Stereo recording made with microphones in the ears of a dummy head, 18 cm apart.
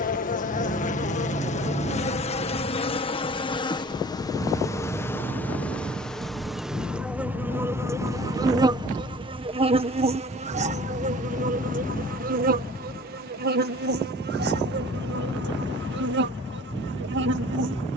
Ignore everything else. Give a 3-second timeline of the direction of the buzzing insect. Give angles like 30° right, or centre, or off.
40° left, 20° left, 10° right, 40° right, 50° right, 60° right.